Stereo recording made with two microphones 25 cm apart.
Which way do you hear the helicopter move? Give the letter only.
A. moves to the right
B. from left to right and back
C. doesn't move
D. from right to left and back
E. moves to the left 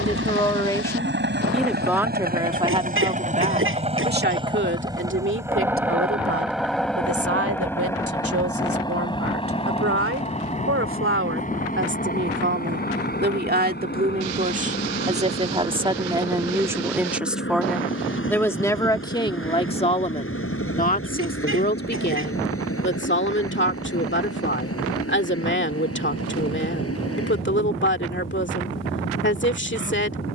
E.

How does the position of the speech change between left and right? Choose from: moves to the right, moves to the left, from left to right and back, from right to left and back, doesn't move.
from left to right and back.